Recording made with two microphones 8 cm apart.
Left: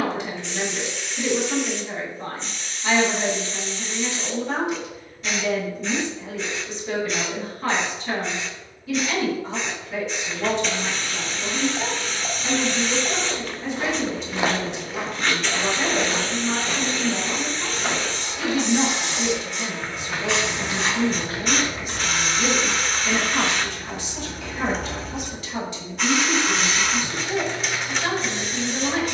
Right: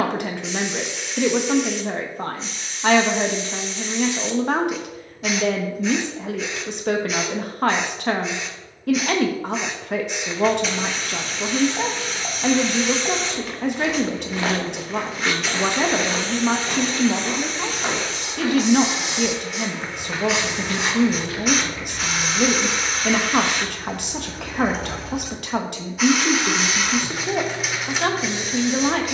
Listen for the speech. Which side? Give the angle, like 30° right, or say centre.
60° right.